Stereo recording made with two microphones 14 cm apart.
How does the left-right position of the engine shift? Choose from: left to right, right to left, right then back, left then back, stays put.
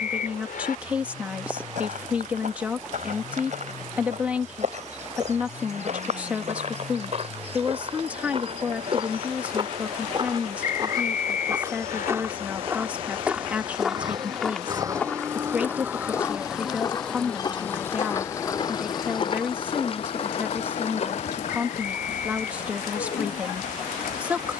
right to left.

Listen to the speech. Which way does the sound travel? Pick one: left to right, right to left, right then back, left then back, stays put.
stays put.